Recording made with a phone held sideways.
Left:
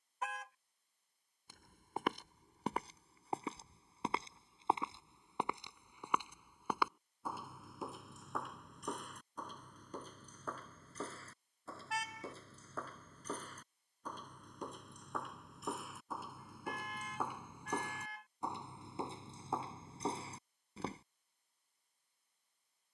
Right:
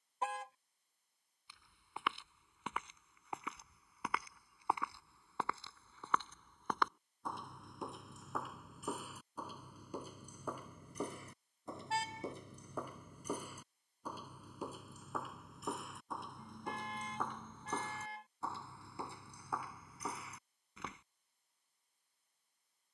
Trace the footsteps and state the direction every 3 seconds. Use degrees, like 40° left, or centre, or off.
40° left, 20° left, centre, 10° right, 10° right, 10° left, 30° left, off.